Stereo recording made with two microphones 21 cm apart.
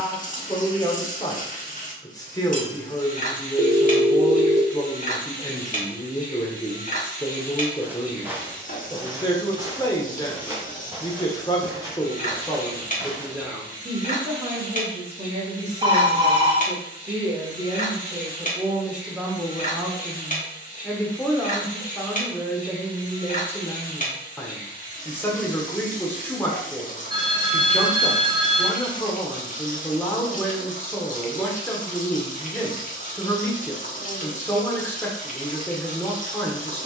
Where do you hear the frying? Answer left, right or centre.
left.